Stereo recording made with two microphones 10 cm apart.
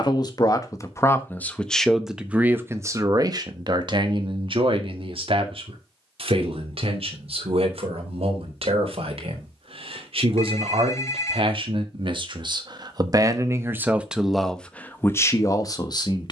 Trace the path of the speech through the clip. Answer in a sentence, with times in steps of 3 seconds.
You can hear the speech in the centre from 0 s, on the right from 3 s and on the left from 15 s.